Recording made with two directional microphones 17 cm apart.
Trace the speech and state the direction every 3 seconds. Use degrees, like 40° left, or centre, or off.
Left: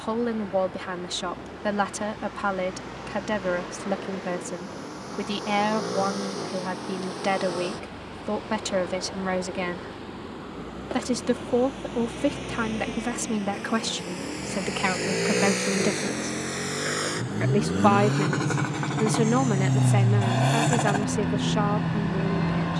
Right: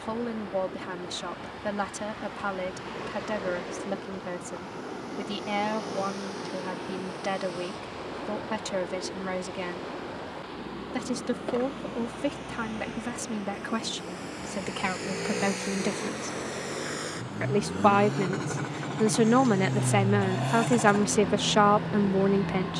30° left, 30° left, 30° left, 30° left, 30° left, 20° left, 20° right, 40° right.